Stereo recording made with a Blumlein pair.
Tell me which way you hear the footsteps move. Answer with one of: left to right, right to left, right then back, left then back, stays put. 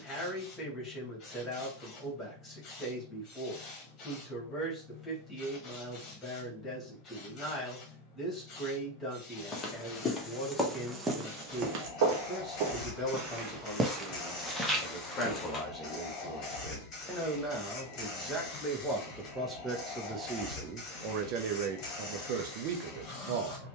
right then back.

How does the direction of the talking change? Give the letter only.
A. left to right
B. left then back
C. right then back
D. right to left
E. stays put
A.